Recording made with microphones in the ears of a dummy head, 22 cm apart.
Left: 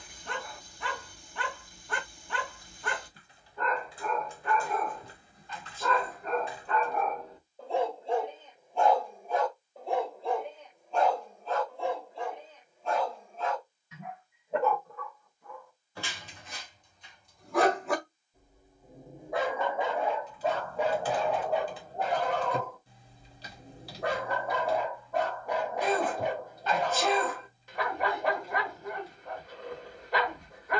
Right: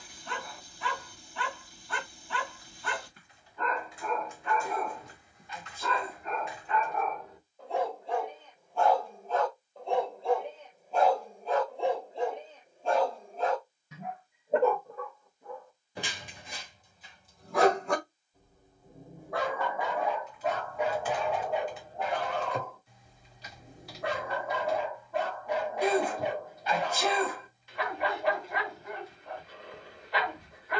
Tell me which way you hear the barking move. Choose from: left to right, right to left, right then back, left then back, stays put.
right then back.